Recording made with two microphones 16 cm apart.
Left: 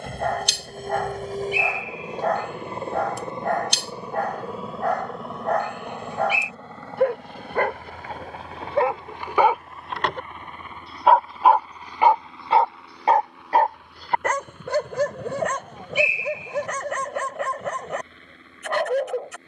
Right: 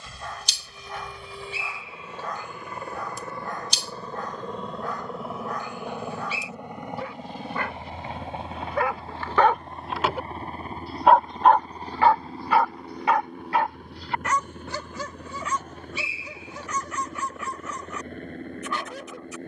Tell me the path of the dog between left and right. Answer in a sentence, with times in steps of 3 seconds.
You can hear the dog on the left from 0 s, in the centre from 9 s and on the left from 12 s.